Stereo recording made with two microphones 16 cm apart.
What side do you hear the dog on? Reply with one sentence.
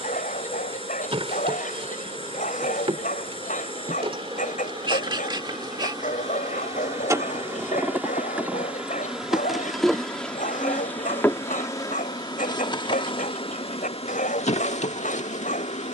You can hear the dog on the left.